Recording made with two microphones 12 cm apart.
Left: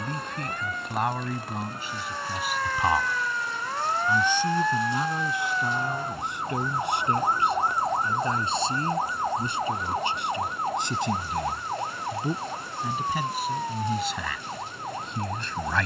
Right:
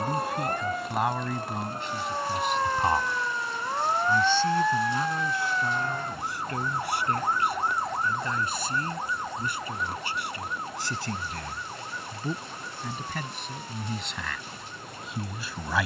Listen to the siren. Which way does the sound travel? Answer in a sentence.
You can hear the siren go from the right side to the left.